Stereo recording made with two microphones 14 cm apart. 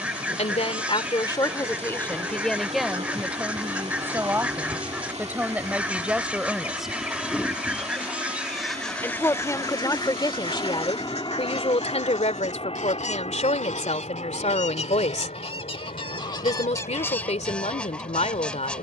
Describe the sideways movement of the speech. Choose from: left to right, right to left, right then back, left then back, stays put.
right then back.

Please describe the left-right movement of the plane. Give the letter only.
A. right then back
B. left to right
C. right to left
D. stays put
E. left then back
C.